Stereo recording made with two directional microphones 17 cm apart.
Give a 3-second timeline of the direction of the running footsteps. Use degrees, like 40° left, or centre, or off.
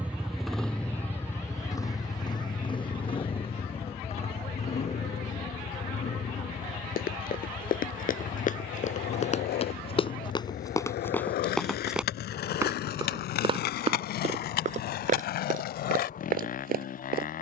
off, off, 50° left, 20° left, 30° right, 50° right.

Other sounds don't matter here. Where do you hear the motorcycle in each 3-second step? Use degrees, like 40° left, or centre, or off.
10° left, 40° left, 40° left, 50° left, 50° left, 50° left.